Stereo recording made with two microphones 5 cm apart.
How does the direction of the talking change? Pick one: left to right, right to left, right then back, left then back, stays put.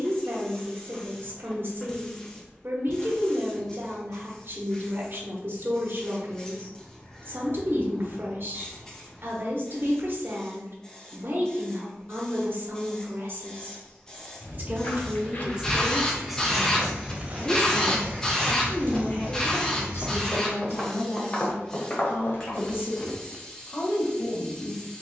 right to left.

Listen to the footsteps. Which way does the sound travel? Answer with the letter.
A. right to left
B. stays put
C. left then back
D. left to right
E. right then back
E.